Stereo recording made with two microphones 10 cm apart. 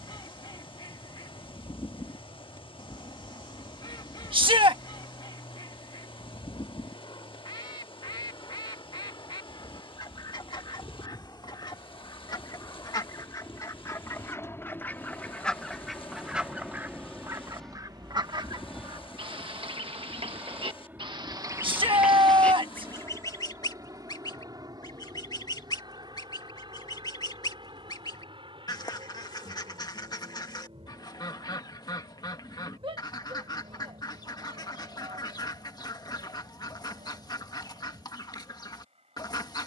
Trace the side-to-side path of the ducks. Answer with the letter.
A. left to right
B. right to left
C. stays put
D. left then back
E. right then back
E.